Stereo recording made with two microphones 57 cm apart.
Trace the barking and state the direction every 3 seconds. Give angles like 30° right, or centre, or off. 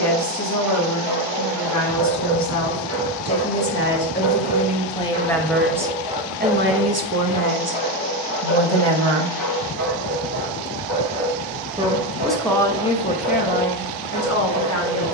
60° right, 30° right, 10° left, 40° left, 40° left.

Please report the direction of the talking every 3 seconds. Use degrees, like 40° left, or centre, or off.
30° left, 10° left, 40° right, 40° right, 20° left.